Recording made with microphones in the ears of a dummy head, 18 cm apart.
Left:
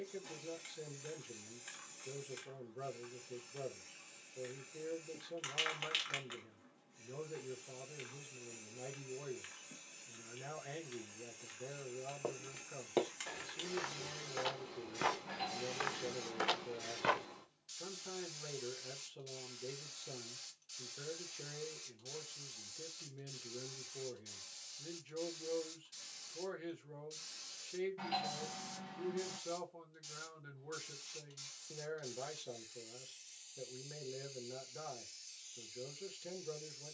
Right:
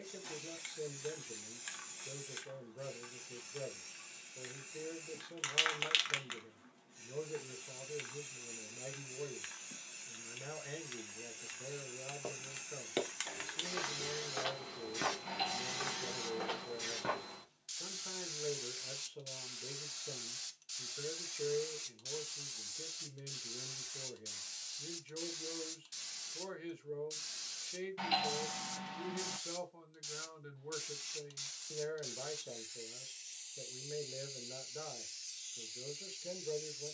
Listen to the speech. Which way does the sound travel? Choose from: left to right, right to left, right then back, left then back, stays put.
stays put.